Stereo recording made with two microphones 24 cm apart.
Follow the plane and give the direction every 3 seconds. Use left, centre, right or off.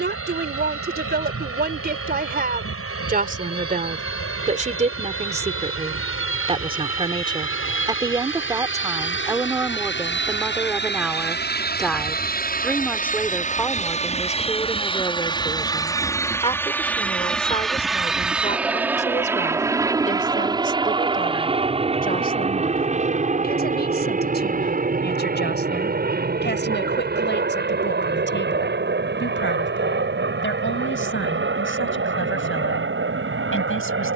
left, left, left, left, left, centre, centre, right, right, right, right, right.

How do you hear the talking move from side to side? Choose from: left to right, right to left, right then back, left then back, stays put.
right to left.